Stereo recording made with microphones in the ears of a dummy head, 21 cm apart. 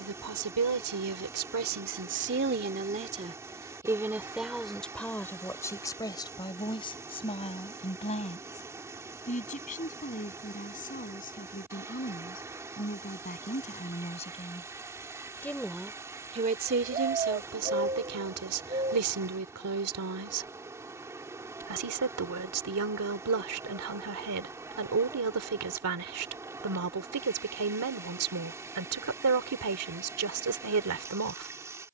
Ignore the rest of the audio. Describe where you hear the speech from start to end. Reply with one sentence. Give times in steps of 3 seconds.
You can hear the speech on the right from 0 s, in the centre from 3 s, on the left from 6 s and on the right from 15 s.